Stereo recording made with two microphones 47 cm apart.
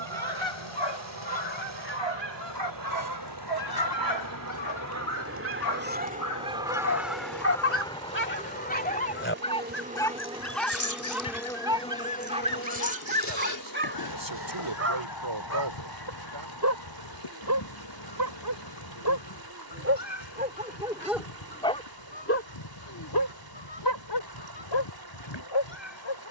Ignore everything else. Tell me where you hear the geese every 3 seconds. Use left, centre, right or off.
right, right, centre, left, left, left, left, left, left.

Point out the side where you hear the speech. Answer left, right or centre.
right.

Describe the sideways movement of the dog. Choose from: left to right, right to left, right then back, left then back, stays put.
right then back.